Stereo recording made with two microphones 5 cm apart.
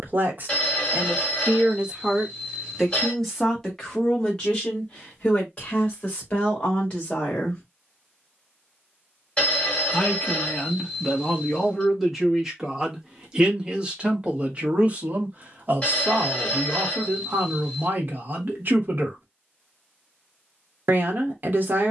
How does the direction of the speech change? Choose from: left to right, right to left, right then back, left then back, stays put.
left then back.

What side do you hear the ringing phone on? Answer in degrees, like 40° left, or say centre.
20° left.